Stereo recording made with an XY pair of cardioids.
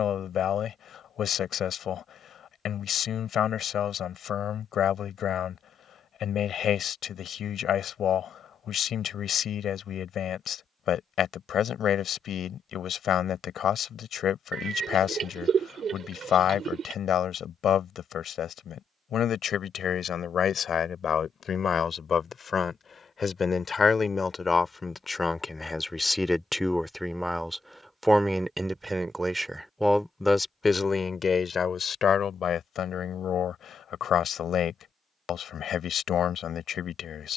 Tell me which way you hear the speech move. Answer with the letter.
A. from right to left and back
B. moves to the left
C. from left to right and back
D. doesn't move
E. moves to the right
C.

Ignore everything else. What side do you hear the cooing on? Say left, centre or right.
right.